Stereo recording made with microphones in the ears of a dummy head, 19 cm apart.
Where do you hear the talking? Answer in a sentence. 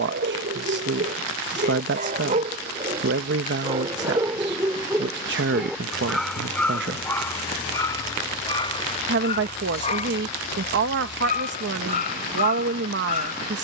You can hear the talking on the right.